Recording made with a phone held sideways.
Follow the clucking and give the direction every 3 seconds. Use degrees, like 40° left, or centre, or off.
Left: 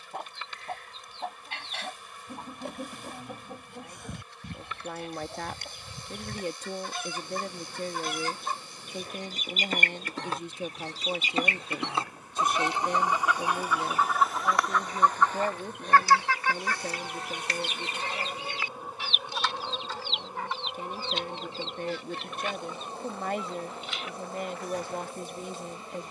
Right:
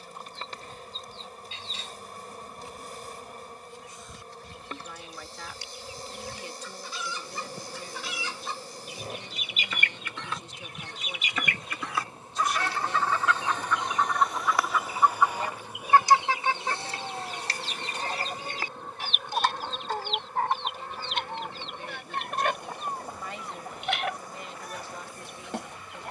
70° left, 60° left, 50° left, 40° left, 10° left, 30° right, 50° right, 60° right, 70° right.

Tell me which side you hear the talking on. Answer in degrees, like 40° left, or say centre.
50° left.